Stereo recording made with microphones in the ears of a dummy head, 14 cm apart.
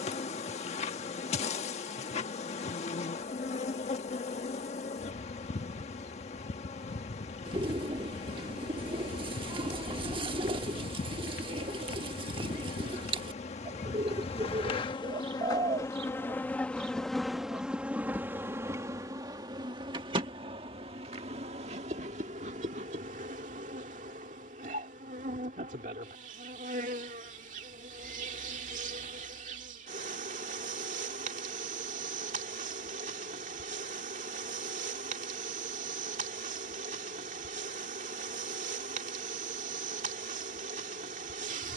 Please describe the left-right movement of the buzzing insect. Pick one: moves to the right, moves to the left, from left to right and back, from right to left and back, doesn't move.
moves to the right.